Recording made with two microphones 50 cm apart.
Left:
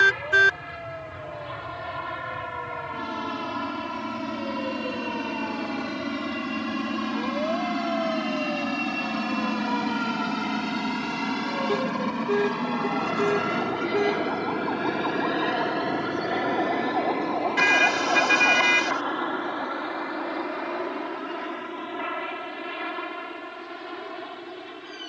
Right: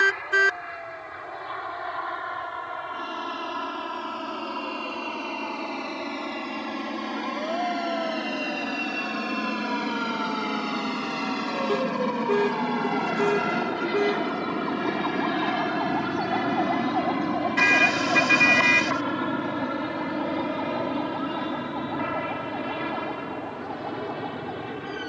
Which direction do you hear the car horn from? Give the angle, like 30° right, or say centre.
centre.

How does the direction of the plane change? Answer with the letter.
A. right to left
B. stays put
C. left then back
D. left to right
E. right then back
D.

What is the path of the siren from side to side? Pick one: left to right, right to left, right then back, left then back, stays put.
left to right.